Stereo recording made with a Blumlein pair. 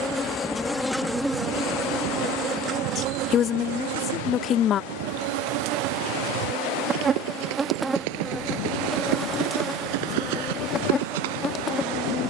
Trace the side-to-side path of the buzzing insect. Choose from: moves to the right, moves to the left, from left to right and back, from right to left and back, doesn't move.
from left to right and back.